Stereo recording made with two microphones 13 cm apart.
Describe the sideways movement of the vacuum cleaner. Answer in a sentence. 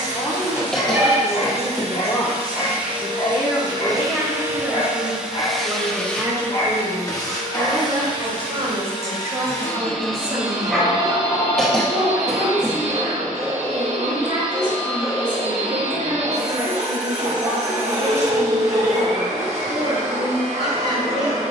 In this clip you hear the vacuum cleaner go left and come back.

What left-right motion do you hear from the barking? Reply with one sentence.
You can hear the barking move to the right.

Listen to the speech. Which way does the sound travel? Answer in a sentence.
In this clip you hear the speech move to the right.